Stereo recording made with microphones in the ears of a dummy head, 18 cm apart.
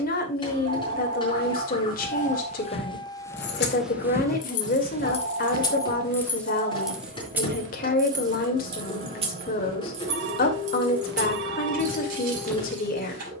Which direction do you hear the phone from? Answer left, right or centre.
right.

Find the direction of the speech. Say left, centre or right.
left.